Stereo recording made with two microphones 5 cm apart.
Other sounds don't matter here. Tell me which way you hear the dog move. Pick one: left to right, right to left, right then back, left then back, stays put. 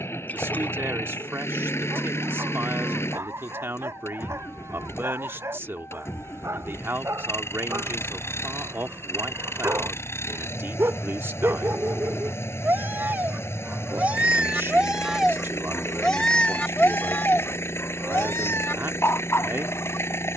right to left.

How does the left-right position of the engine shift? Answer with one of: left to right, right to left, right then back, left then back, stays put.
stays put.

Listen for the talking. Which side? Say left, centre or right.
right.